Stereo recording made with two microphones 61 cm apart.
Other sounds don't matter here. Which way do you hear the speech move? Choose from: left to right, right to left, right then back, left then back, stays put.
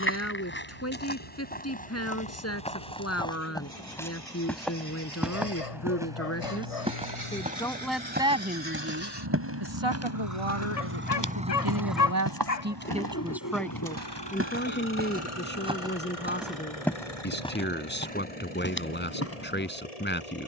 right then back.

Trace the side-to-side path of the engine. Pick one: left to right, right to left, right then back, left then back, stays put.
right to left.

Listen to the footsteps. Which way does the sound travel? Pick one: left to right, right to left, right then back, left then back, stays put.
right then back.